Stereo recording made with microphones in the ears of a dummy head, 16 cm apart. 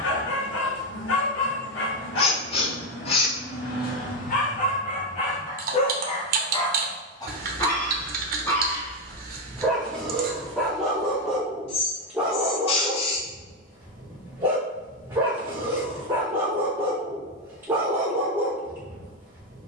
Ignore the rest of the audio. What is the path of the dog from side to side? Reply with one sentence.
You can hear the dog move to the right.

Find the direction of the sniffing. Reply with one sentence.
In this clip you hear the sniffing on the left.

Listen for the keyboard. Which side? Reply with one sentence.
In this clip you hear the keyboard on the right.